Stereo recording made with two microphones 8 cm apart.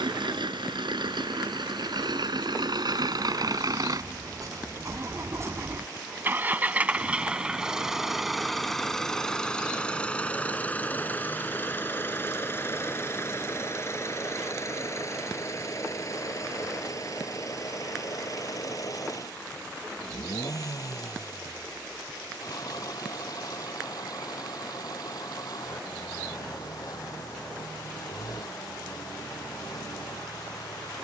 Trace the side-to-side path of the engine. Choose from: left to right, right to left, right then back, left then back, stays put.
right to left.